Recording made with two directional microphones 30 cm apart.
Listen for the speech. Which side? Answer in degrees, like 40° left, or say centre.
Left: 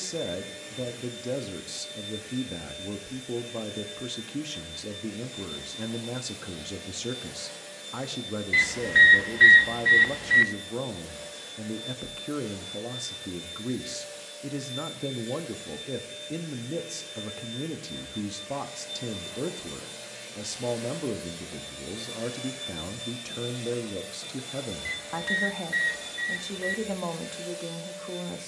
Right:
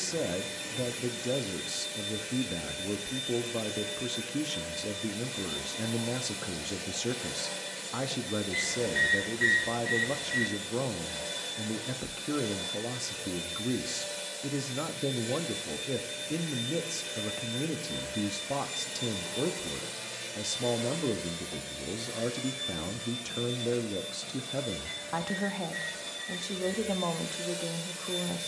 centre.